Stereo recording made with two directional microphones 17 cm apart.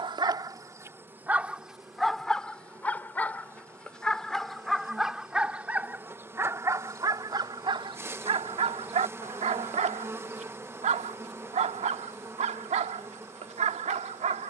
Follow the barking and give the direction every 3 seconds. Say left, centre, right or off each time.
centre, centre, right, right, right.